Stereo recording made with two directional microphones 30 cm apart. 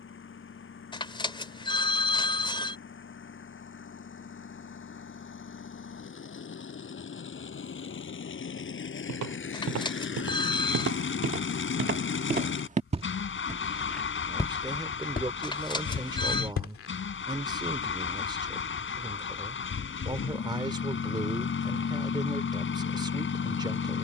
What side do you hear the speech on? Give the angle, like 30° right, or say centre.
10° right.